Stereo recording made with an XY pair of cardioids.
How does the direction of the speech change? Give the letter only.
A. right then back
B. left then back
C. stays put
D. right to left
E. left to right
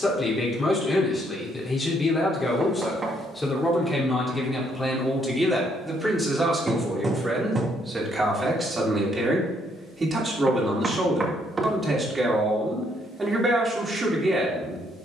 E.